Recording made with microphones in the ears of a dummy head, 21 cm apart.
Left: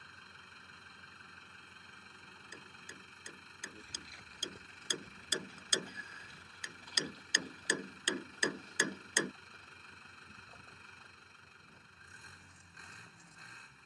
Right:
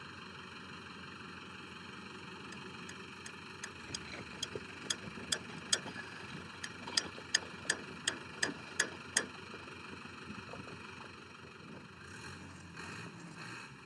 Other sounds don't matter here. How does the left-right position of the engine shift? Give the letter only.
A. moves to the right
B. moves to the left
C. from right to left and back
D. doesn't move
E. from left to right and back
D.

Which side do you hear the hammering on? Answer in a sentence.
You can hear the hammering on the left.